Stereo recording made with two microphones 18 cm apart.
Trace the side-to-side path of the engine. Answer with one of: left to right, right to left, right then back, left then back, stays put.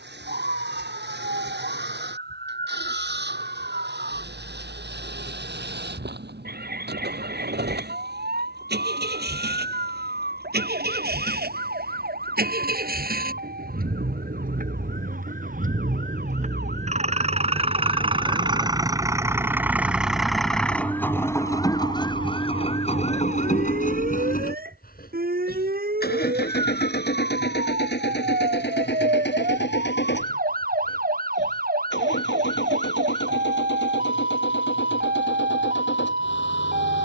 right to left.